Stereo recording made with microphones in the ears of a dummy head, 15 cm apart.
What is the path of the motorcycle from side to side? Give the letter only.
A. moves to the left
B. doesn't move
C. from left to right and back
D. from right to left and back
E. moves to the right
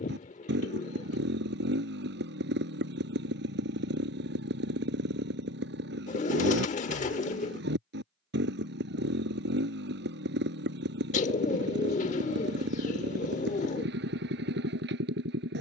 B.